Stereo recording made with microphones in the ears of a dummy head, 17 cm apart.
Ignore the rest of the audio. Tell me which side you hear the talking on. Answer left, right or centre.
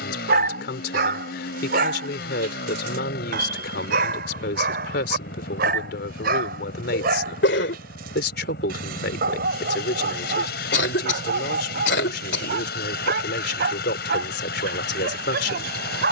left.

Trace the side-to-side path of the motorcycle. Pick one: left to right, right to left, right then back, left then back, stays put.
stays put.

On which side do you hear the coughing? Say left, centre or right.
left.